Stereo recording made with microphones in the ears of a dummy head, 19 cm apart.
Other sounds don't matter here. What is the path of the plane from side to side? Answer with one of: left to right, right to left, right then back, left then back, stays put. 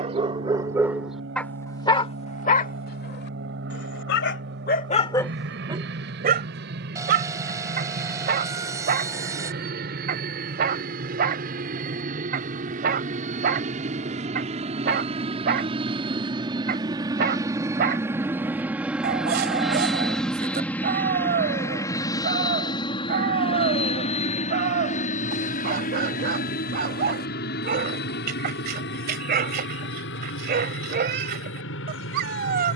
right to left.